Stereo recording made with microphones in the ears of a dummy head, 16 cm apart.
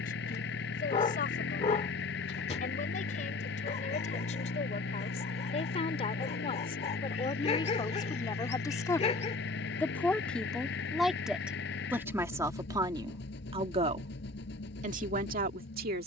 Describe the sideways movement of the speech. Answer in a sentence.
In this clip you hear the speech travel towards the right.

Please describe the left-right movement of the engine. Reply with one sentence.
In this clip you hear the engine stay in one place.